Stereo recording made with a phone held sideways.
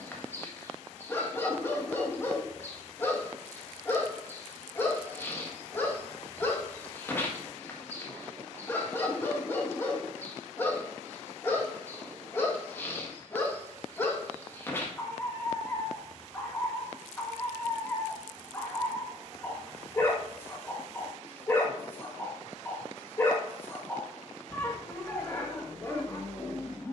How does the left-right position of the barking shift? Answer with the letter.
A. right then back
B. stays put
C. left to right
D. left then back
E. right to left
B.